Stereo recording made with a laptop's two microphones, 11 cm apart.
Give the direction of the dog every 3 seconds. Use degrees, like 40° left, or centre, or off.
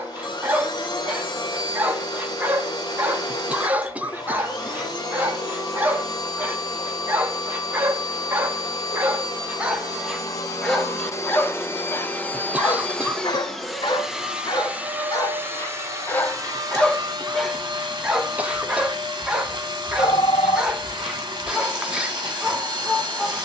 20° right, 20° right, 20° right, centre, 40° left, 20° left, 10° right, 10° right.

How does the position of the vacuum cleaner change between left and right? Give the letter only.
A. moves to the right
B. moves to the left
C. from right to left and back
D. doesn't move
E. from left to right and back
A.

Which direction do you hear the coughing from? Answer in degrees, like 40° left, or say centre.
10° right.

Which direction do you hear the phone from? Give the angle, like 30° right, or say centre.
50° left.